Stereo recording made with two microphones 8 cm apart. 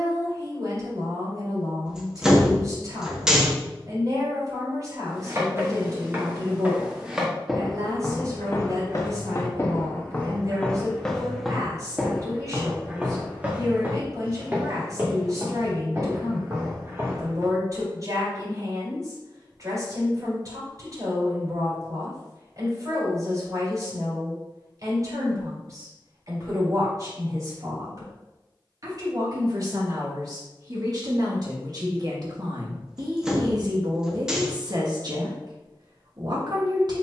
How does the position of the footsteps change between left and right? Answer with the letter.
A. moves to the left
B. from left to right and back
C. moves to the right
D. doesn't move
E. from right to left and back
E.